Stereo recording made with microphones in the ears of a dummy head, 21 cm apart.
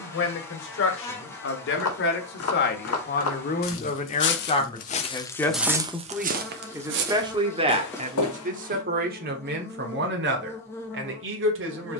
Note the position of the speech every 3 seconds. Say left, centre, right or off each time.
left, left, right, right.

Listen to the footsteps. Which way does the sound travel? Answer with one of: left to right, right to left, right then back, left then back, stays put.
right then back.